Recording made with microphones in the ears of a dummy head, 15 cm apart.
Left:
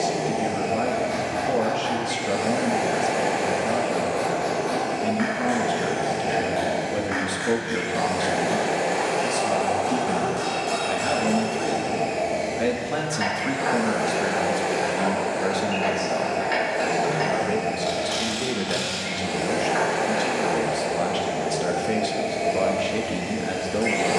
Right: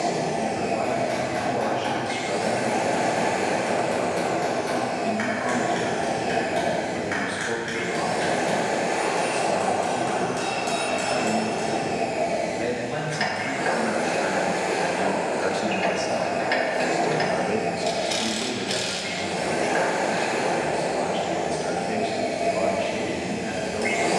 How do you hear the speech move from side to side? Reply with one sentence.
In this clip you hear the speech move from left to right and back again.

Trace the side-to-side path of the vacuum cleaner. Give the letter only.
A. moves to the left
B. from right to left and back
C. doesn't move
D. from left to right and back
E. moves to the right
C.